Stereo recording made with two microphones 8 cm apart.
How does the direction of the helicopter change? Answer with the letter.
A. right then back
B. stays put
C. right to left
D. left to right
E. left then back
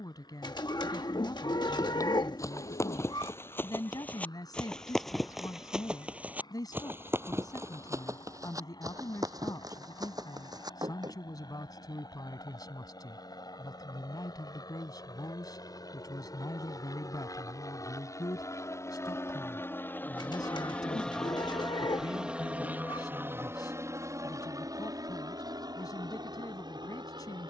D.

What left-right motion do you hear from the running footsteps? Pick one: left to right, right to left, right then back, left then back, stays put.
left to right.